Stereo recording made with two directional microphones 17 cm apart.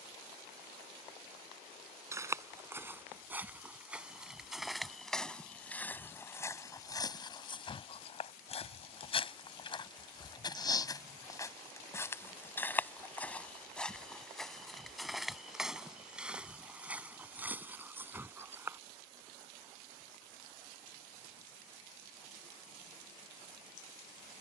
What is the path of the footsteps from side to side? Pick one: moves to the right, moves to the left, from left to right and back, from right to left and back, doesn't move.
from right to left and back.